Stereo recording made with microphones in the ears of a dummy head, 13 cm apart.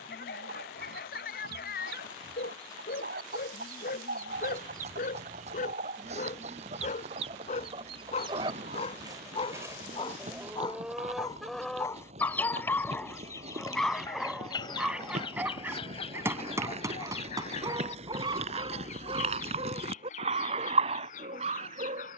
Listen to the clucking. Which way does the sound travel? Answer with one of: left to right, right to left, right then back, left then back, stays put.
right to left.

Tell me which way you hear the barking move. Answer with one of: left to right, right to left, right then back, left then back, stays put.
left to right.